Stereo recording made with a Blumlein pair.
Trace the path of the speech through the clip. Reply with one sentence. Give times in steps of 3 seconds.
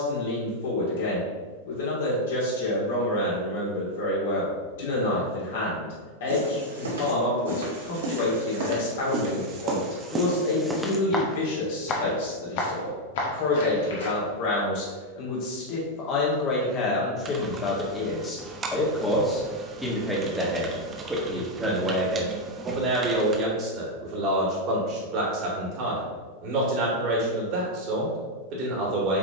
You can hear the speech on the left from 0 s, in the centre from 18 s and on the right from 21 s.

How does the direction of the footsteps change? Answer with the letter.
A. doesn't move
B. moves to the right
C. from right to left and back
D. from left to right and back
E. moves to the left
E.